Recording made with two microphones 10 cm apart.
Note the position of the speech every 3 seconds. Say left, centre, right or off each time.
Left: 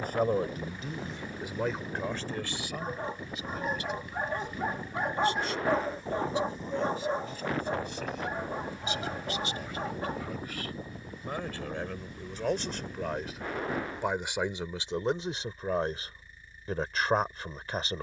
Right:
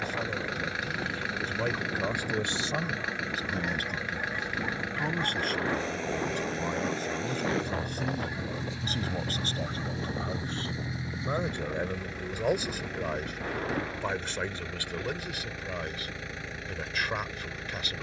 centre, right, right, right, centre, left.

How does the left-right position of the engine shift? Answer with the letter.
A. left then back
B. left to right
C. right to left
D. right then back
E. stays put
E.